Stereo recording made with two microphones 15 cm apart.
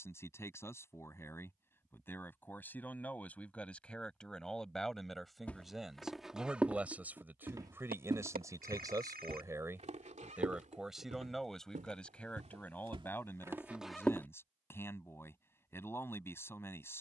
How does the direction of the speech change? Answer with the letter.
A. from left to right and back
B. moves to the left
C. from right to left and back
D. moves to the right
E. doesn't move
A.